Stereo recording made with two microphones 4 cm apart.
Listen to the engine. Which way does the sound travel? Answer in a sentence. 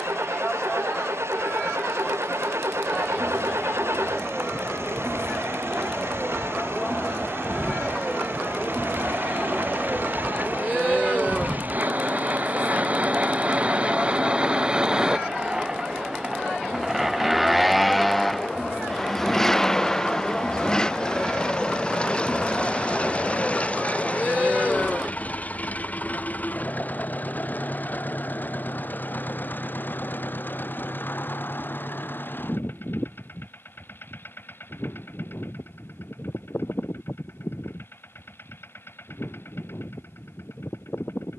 In this clip you hear the engine go from the right side to the left.